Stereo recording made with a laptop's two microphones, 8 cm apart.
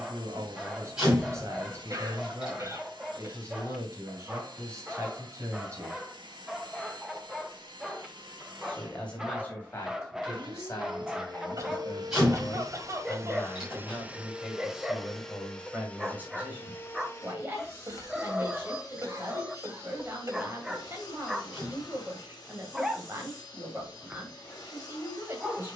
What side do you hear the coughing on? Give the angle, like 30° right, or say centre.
40° right.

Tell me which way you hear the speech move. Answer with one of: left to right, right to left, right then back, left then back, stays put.
left then back.